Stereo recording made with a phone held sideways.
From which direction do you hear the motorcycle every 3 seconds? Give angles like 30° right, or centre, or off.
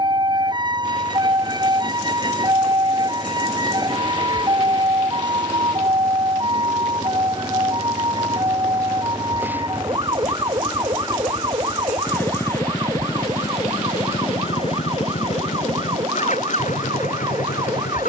50° right, 40° right, 30° right, centre, 30° left, 50° left.